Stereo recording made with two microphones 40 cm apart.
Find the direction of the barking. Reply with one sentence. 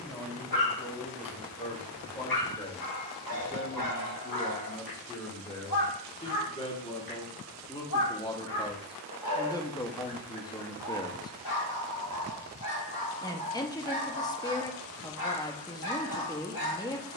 You can hear the barking on the left.